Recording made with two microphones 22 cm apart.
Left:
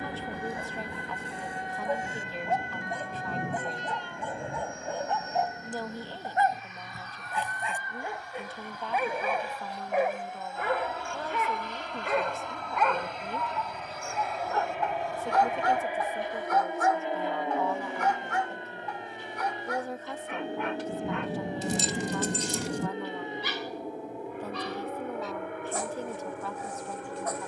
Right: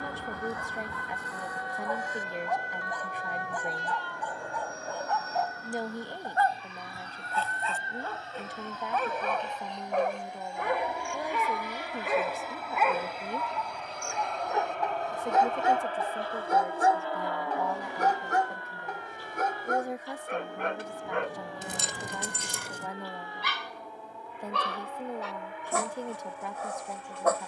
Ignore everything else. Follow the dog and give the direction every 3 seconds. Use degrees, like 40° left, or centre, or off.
30° left, 20° left, 20° left, centre, 10° right, 30° right, 50° right, 70° right, 80° right.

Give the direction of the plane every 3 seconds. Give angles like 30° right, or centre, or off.
50° right, 40° right, 30° right, 20° right, centre, 10° left, 30° left, 40° left, 50° left.